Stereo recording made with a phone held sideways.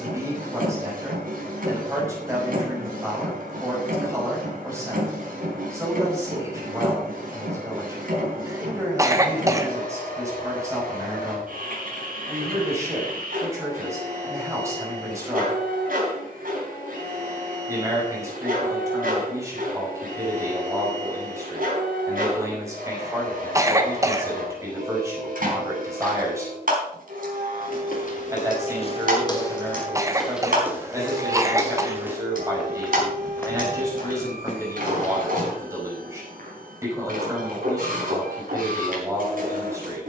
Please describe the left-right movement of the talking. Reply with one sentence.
In this clip you hear the talking stay put.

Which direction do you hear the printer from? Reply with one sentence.
In this clip you hear the printer on the right.